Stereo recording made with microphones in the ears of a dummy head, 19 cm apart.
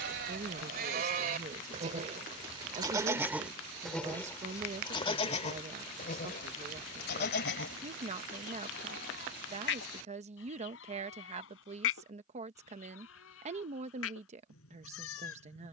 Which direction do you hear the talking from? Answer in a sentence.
In this clip you hear the talking on the right.